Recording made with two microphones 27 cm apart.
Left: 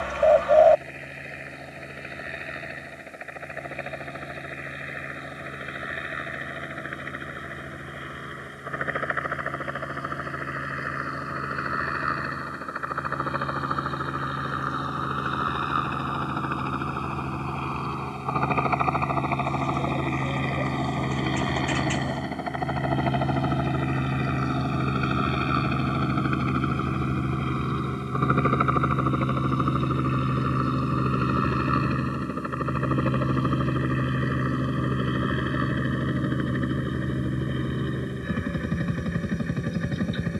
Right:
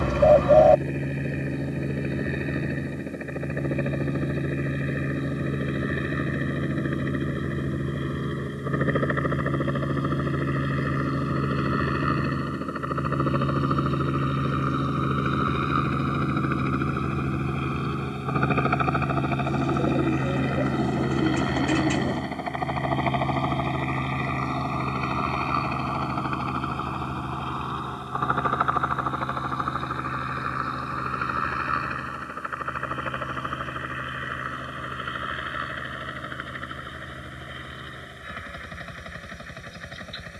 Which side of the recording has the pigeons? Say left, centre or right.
right.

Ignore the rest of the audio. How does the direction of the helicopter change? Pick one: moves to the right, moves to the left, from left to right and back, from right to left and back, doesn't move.
moves to the left.